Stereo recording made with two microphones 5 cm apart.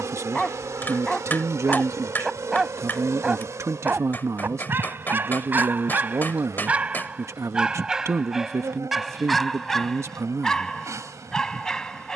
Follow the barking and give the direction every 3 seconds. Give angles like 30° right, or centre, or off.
centre, 30° right, 20° right, 10° left.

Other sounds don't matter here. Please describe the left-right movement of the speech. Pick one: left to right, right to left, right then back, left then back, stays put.
stays put.